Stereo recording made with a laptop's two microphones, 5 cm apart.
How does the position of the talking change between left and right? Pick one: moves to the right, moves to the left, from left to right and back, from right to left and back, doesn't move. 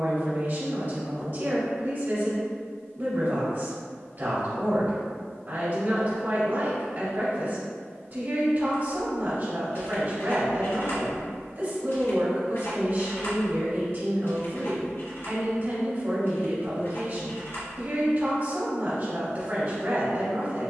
doesn't move.